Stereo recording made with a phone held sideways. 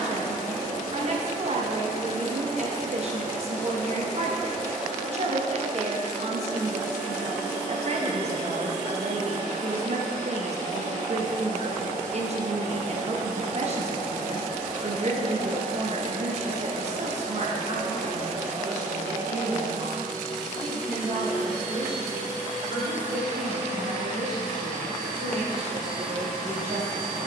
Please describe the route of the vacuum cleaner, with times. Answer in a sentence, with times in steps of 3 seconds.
You can hear the vacuum cleaner on the left from 0 s, in the centre from 3 s and on the right from 6 s.